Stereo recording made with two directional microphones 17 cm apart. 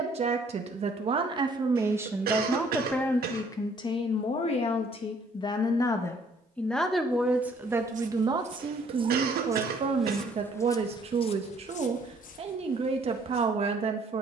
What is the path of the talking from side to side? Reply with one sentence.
In this clip you hear the talking go left and come back.